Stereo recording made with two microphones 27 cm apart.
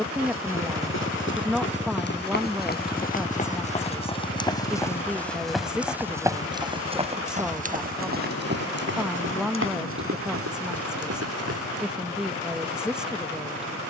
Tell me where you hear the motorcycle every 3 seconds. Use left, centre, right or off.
centre, left, left, left, left.